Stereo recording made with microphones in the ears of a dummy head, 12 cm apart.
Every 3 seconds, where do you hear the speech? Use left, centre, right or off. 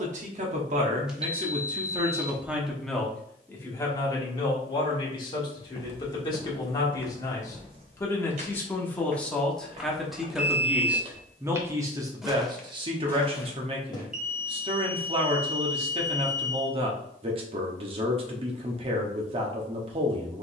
right, left, left, centre, right, right, right.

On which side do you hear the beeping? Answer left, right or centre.
centre.